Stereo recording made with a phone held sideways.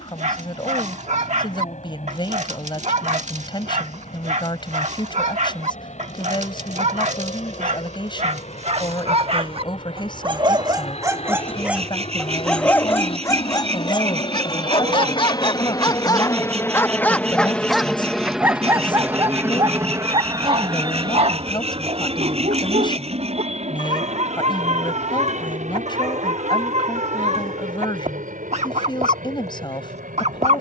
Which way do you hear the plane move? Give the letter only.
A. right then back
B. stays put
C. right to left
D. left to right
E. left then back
D.